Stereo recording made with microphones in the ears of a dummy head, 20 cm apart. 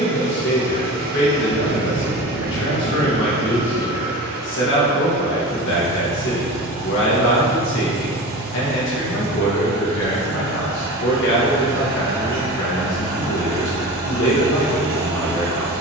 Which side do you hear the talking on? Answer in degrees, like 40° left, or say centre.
60° left.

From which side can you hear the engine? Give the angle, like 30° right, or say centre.
40° right.